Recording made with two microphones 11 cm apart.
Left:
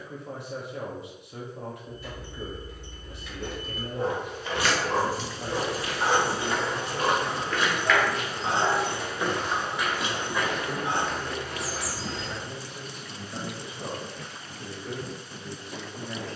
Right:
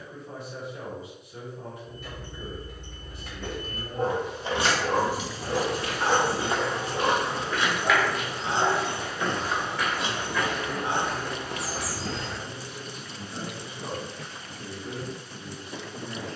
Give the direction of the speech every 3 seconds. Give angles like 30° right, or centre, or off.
70° left, 60° left, 10° left, 10° right, 10° right, 10° right.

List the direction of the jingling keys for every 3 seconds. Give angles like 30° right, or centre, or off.
60° right, 30° right, 30° left, 30° right, off, off.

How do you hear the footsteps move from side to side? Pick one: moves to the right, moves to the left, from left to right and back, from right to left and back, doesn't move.
from right to left and back.